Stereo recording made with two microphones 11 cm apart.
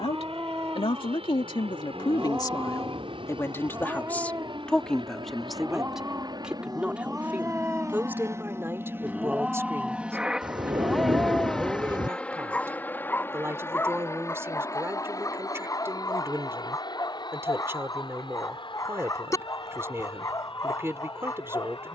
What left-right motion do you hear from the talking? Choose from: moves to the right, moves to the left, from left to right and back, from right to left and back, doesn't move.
moves to the right.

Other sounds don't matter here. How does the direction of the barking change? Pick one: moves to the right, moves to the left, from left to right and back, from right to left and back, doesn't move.
moves to the left.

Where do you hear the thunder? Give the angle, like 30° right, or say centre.
40° right.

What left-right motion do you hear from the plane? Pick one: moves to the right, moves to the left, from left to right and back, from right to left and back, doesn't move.
moves to the left.